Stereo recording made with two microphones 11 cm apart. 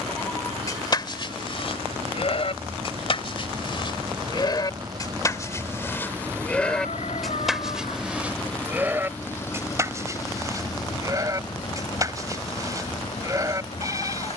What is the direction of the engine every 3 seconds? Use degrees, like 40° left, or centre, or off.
60° right, 40° right, centre, 30° left, 50° left.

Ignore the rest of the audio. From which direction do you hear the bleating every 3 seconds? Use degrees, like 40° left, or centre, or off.
50° left, 40° left, centre, 30° right, 30° right.